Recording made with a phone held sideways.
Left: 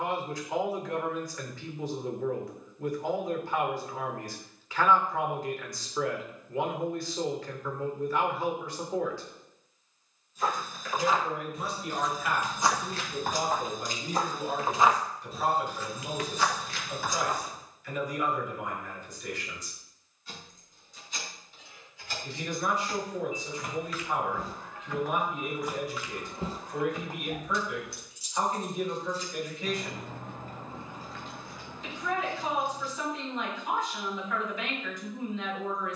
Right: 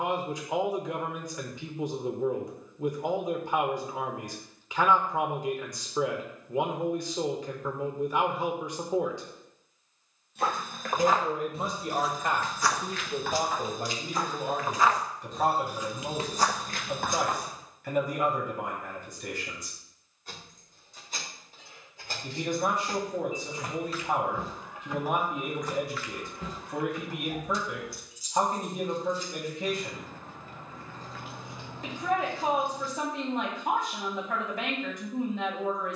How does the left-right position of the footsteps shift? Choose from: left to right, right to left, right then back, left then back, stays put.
left then back.